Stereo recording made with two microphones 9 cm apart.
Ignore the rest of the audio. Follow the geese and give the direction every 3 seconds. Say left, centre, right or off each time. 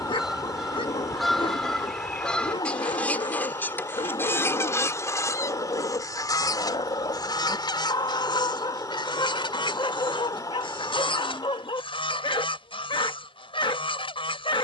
centre, left, left, left, left.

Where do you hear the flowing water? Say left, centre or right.
left.